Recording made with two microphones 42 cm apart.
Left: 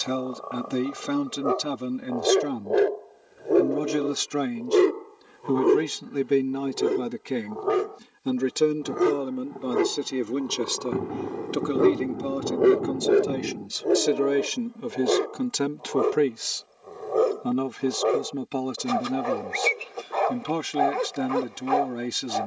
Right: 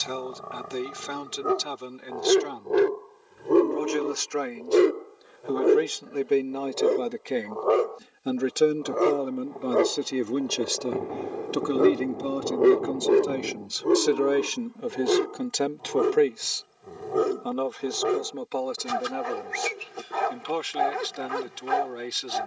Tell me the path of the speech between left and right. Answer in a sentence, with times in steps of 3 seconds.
In this clip you hear the speech on the left from 0 s, in the centre from 9 s and on the left from 15 s.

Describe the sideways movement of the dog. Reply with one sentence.
You can hear the dog move from right to left and back again.